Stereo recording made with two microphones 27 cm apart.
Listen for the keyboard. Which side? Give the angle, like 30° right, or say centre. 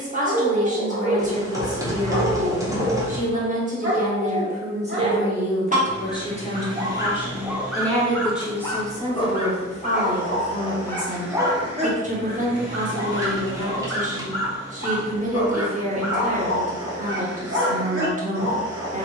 10° right.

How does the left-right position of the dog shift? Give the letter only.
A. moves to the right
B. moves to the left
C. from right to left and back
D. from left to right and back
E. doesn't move
C.